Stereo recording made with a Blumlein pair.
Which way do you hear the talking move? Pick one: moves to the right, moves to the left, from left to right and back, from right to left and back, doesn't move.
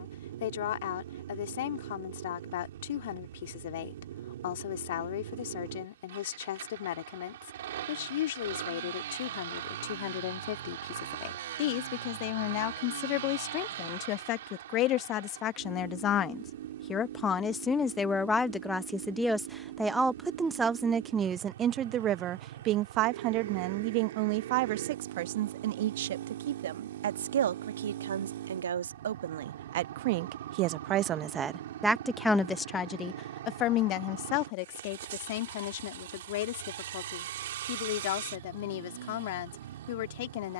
from left to right and back.